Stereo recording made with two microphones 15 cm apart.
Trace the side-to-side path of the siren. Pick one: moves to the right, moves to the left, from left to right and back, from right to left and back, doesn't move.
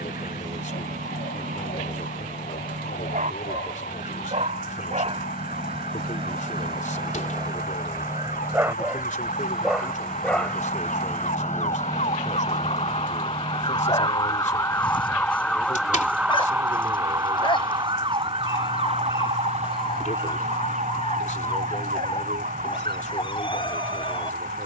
moves to the right.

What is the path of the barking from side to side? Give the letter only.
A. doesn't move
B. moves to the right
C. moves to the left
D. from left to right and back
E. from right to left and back
C.